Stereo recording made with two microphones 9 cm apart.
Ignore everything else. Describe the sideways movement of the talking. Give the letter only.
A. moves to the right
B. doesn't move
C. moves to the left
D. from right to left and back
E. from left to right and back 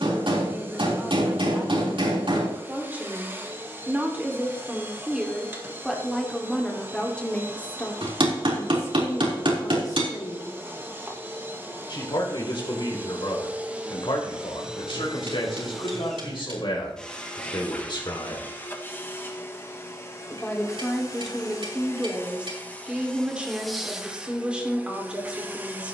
D.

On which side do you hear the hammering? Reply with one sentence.
In this clip you hear the hammering on the right.